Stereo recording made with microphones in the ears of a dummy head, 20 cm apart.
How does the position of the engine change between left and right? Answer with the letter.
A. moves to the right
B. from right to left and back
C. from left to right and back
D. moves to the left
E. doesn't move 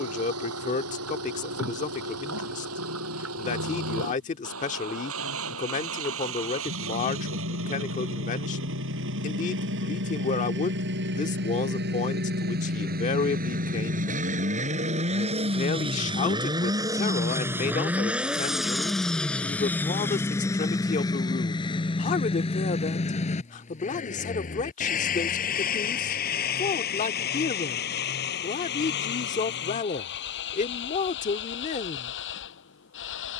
D.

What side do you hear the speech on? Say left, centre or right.
left.